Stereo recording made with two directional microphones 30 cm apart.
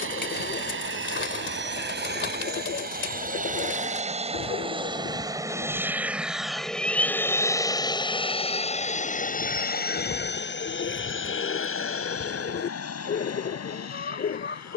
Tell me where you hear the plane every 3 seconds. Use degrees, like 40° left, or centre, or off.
40° right, 20° right, 10° left, 30° left, 50° left.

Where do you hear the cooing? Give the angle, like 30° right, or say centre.
40° left.